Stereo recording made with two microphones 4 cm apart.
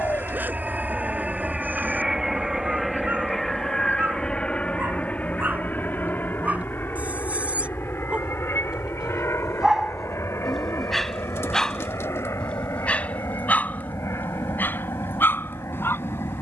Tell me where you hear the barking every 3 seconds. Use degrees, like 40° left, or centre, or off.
40° right, 40° right, 30° right, centre, 40° left, 60° left.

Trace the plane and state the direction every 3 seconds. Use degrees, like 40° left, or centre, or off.
20° right, 20° left, 50° left, 60° left, 70° left, 70° left.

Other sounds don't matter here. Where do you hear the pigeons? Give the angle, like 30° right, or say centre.
80° left.